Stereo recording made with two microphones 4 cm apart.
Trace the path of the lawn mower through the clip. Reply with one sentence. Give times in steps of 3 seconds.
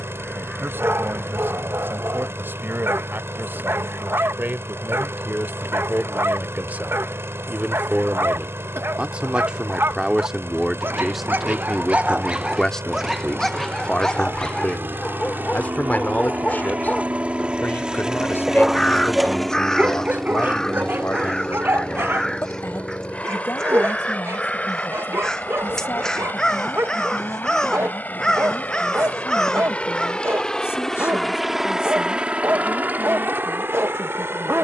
You can hear the lawn mower on the right from 0 s, in the centre from 18 s, on the left from 21 s, in the centre from 30 s and on the right from 33 s.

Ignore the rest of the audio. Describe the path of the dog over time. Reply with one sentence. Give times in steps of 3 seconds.
You can hear the dog on the right from 0 s, in the centre from 12 s, on the left from 15 s and on the right from 18 s.